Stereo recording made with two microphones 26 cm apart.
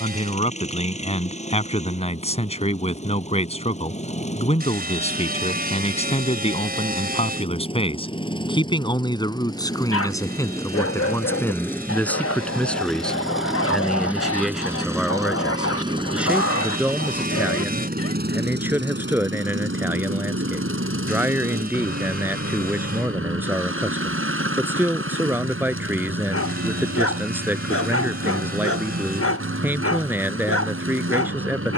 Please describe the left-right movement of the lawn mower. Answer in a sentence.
In this clip you hear the lawn mower move to the right.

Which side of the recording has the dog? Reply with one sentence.
You can hear the dog on the left.